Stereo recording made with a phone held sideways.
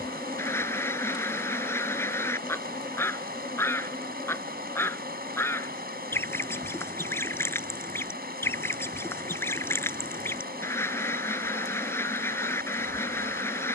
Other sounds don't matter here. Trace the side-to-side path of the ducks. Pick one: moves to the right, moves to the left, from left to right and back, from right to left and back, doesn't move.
doesn't move.